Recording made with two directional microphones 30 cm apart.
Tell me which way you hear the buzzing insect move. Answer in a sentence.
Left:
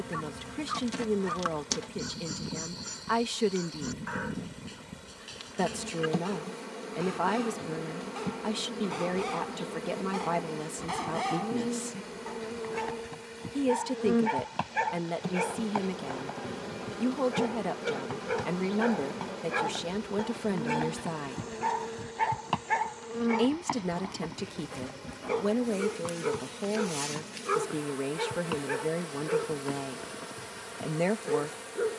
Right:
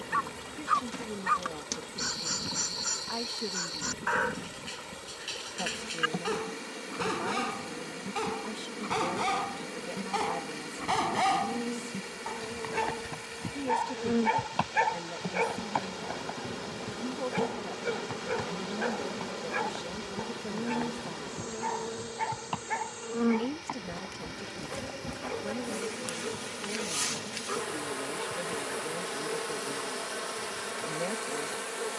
In this clip you hear the buzzing insect move to the right.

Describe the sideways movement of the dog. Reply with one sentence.
In this clip you hear the dog move to the left.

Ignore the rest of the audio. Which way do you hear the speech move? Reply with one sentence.
In this clip you hear the speech stay put.